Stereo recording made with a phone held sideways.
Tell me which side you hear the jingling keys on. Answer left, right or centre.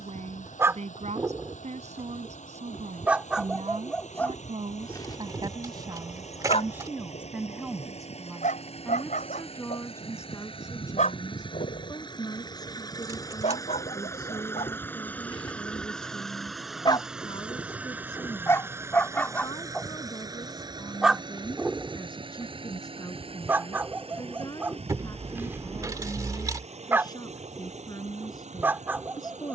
right.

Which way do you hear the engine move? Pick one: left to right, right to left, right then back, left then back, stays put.
left to right.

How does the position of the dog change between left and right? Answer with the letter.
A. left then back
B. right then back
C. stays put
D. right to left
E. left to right
A.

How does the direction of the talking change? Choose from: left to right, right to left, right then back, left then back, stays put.
right to left.